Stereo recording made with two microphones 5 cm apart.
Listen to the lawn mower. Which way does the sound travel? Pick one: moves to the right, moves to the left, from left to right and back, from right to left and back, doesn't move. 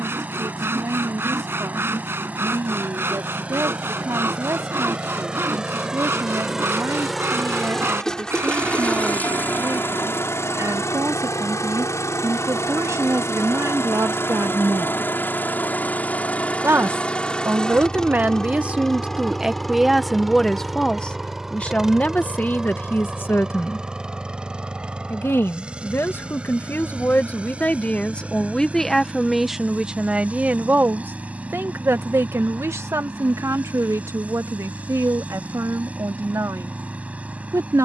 from right to left and back.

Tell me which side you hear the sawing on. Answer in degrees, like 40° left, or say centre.
50° right.